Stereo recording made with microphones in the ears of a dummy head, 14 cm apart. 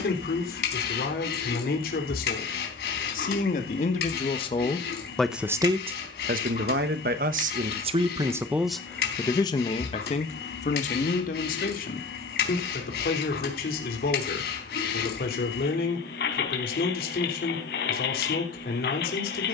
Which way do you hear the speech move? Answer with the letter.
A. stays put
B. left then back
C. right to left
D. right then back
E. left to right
D.